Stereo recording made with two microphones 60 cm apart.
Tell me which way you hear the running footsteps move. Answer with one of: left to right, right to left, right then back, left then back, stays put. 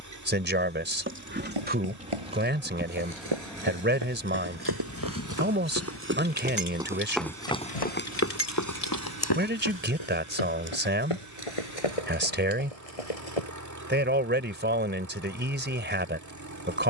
right to left.